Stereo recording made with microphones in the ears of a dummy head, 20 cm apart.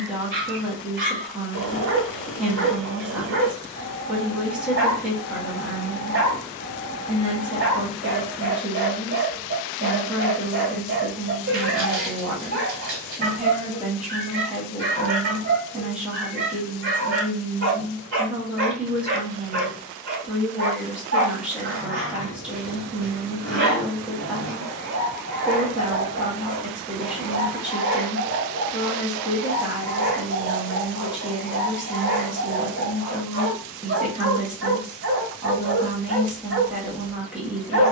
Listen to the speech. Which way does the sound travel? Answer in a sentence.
In this clip you hear the speech stay put.